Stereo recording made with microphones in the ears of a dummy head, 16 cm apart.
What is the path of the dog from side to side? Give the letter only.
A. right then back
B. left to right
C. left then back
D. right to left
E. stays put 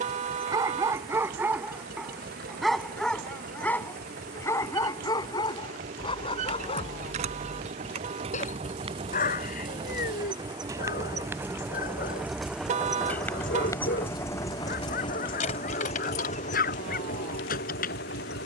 D.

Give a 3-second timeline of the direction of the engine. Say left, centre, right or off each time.
right, right, right, right, centre, left.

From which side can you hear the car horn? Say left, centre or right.
right.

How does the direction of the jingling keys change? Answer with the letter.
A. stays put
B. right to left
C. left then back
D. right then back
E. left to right
B.